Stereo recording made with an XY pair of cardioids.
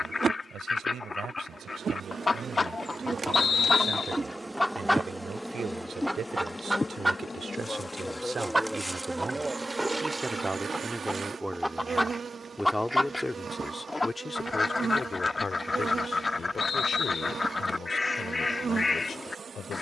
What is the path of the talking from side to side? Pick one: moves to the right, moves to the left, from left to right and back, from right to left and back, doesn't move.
moves to the left.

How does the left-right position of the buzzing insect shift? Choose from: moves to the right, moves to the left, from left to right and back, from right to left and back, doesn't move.
from right to left and back.